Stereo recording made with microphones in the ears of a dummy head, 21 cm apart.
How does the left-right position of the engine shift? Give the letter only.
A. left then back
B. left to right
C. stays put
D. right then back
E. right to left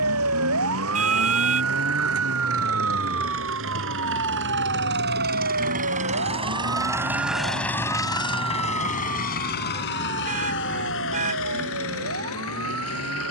E.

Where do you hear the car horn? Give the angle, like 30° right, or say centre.
30° right.